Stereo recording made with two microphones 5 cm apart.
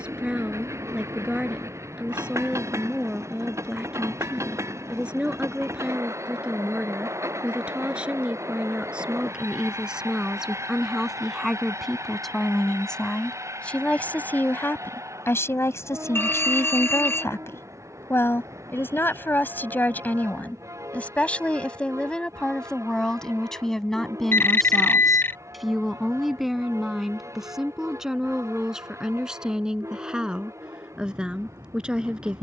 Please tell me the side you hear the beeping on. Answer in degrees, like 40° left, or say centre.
50° left.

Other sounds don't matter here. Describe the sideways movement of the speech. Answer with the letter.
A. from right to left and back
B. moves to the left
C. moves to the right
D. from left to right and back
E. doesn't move
A.